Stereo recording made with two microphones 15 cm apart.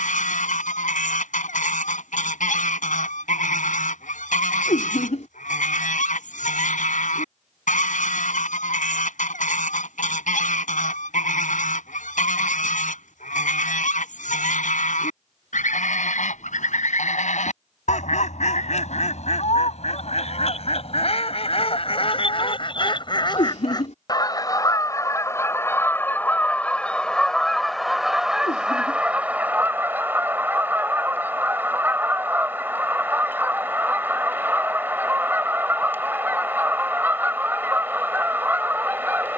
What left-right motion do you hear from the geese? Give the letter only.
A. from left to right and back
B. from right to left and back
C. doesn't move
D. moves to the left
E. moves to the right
E.